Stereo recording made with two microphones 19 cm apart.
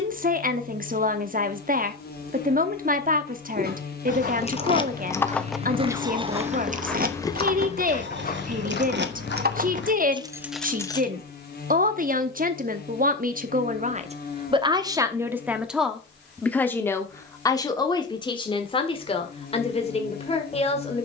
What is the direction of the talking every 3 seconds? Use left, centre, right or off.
right, right, right, right, right, centre, left.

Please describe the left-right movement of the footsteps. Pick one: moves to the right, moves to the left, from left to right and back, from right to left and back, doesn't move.
moves to the left.